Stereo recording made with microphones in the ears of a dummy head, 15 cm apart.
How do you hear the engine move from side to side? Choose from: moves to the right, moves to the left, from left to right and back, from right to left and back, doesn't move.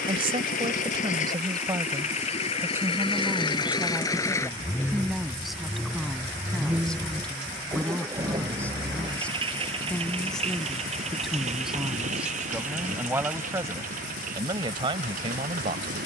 moves to the right.